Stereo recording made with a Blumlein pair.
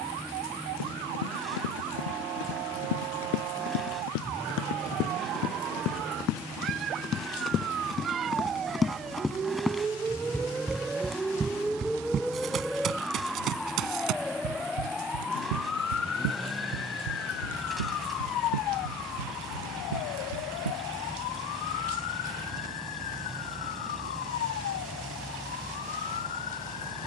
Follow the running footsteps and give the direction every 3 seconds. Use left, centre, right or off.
left, left, left, centre, right, right, right, off, off.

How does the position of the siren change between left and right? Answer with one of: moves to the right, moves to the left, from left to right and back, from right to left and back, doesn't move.
moves to the left.